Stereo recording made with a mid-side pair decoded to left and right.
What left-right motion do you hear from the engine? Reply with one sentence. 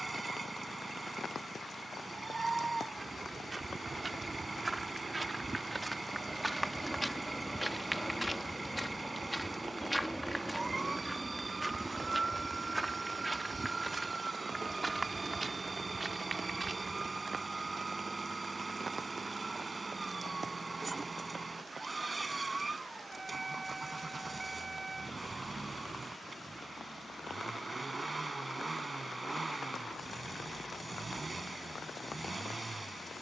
You can hear the engine stay in one place.